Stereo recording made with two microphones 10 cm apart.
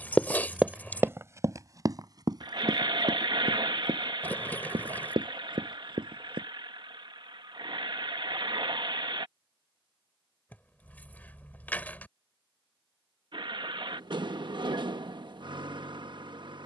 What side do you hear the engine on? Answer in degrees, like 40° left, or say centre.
50° right.